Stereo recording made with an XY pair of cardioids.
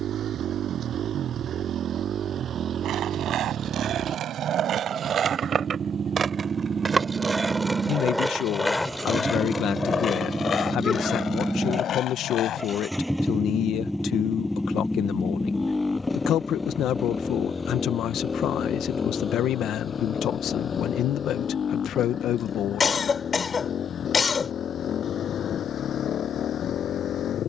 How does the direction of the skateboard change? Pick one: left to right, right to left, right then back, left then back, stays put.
right to left.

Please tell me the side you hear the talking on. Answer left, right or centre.
left.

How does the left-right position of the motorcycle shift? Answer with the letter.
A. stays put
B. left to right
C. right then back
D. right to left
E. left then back
D.